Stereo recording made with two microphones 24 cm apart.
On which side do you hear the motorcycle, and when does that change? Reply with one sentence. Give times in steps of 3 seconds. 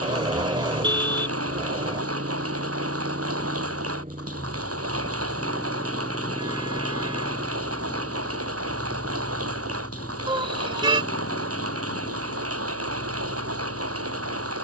In this clip you hear the motorcycle on the right from 0 s, in the centre from 6 s and on the left from 9 s.